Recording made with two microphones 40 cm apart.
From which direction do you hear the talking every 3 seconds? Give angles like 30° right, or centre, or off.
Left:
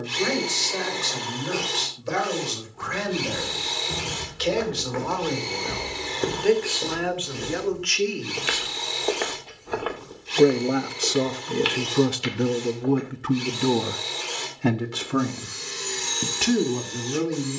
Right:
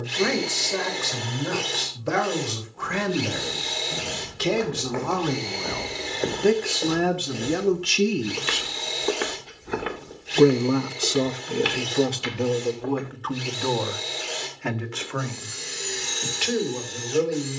80° right, 70° right, 60° right, centre, 40° left, 60° left.